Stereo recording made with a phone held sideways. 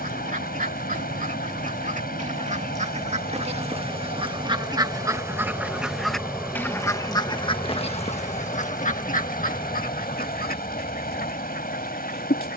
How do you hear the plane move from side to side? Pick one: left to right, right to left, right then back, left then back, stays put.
right to left.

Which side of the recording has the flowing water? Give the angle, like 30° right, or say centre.
70° left.